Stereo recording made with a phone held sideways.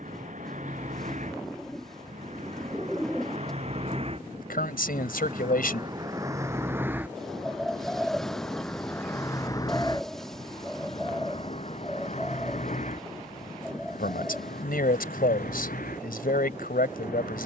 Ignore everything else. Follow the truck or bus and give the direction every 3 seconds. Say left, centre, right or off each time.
right, right, centre, left, left, left.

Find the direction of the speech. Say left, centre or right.
left.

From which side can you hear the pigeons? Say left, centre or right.
centre.